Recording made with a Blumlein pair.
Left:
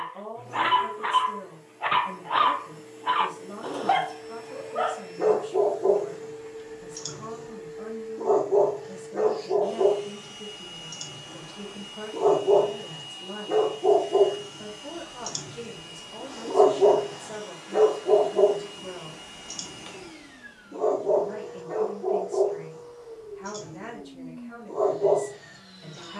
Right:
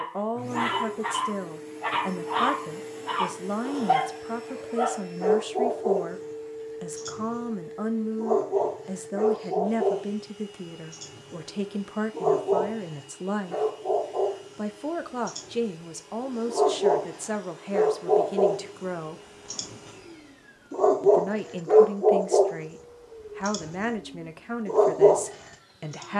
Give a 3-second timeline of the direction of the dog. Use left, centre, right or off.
left, left, left, left, left, left, centre, right, right.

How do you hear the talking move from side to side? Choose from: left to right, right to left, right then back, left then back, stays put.
stays put.